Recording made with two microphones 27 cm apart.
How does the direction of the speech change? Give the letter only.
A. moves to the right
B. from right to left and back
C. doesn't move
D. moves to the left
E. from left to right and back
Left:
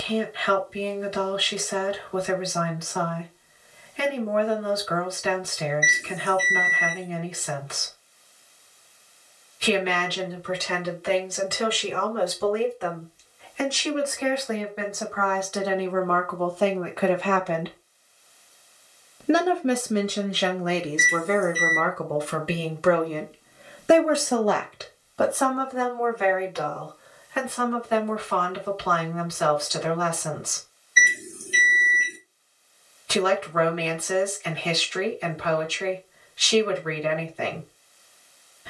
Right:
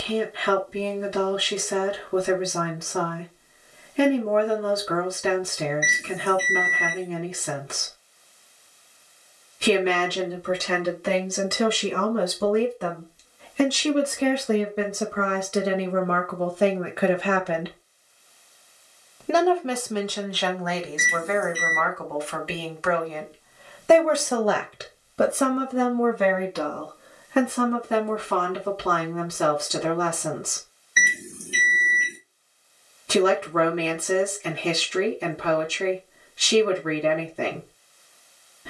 B.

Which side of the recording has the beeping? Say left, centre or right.
right.